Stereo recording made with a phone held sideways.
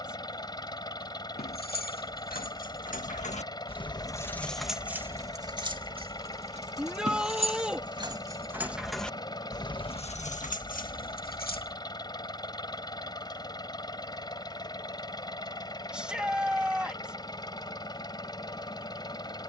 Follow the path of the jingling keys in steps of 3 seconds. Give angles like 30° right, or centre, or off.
70° left, centre, 30° right, 50° left, off, off, off.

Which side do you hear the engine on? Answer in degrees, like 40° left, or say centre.
30° left.